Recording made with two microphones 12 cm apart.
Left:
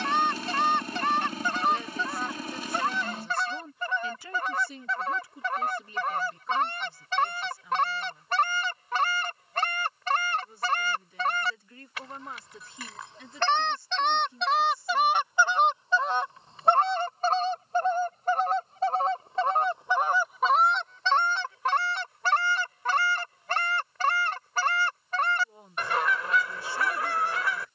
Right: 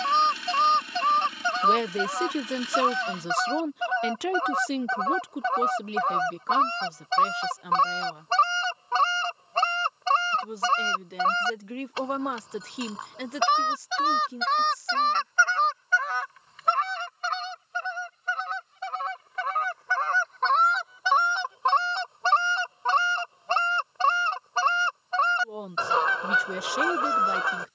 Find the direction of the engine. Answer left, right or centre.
left.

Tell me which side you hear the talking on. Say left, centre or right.
right.